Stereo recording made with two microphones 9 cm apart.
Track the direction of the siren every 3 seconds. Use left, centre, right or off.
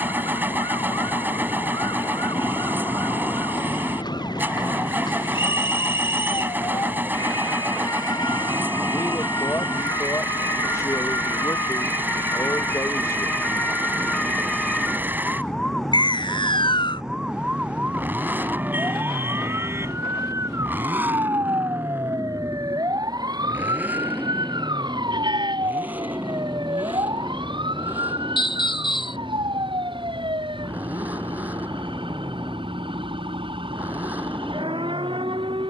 left, left, left, left, left, centre, right, right, right, right, right, right.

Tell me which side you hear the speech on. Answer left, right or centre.
left.